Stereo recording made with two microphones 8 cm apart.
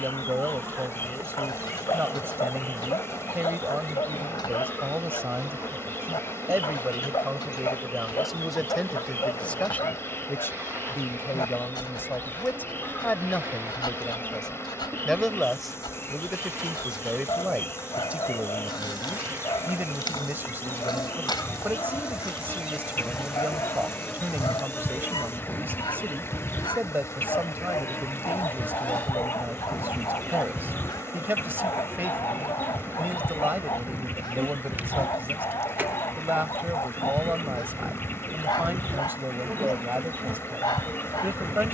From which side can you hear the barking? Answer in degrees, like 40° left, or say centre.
70° left.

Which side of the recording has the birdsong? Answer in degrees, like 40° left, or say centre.
30° left.